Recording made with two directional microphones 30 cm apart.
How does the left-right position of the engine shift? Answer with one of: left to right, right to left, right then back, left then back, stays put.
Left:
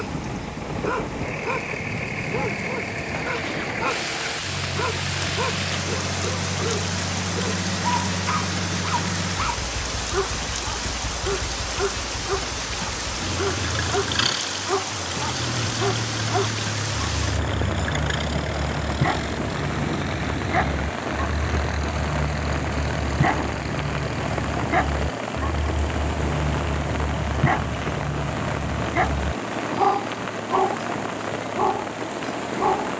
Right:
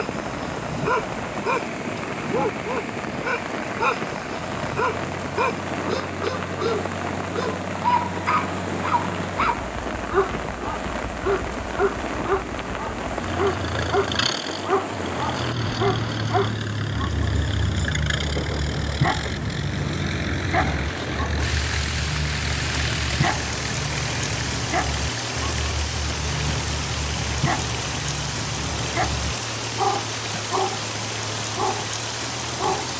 left to right.